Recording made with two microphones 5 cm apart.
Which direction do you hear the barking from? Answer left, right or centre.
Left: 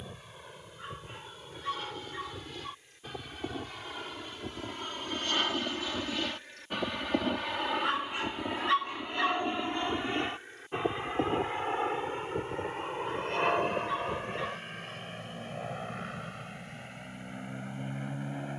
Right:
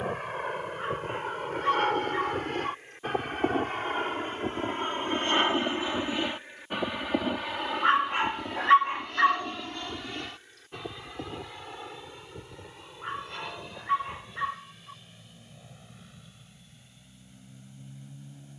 right.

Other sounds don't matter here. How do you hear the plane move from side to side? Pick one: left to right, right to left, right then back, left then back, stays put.
right to left.